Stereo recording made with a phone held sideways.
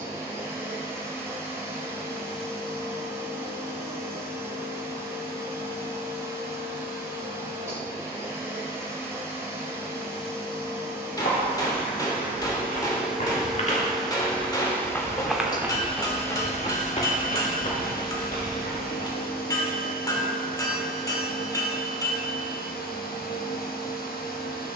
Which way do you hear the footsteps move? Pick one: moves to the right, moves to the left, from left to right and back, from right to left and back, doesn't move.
from left to right and back.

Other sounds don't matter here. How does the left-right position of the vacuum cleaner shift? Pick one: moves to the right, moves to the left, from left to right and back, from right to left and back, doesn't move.
moves to the left.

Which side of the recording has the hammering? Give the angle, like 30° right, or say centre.
20° left.